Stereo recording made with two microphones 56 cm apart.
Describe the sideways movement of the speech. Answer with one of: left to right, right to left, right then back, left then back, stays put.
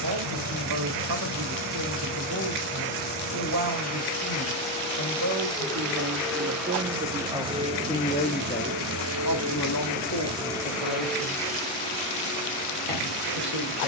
right to left.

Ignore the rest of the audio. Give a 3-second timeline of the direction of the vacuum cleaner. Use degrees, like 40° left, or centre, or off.
20° left, 10° left, 10° right, 10° right, 20° left.